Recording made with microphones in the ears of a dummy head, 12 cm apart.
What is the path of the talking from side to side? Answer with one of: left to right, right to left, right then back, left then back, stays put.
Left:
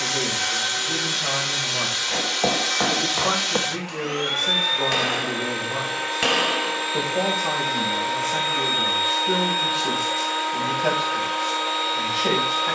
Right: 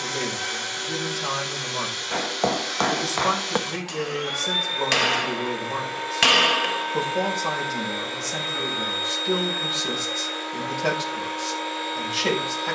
stays put.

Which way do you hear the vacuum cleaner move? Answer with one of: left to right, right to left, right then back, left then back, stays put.
stays put.